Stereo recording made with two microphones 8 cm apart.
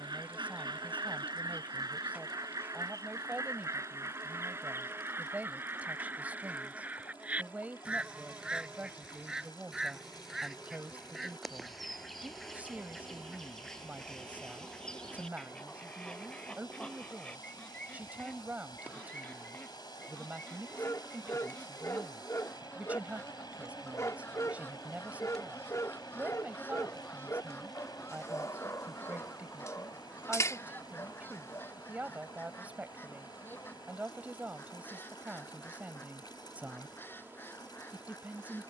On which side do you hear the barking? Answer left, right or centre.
left.